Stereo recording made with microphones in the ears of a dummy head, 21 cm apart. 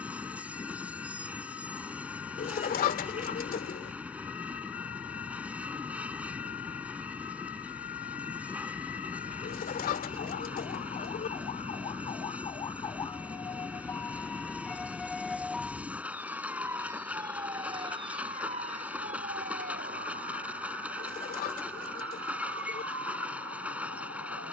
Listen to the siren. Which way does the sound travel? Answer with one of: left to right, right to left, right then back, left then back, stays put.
left to right.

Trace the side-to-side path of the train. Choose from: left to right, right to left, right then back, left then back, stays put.
stays put.